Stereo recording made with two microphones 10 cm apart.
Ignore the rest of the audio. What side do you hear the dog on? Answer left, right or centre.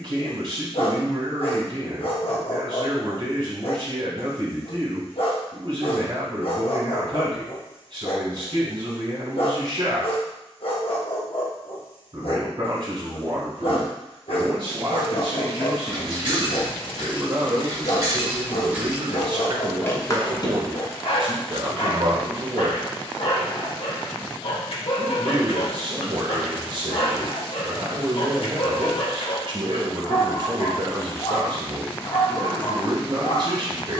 left.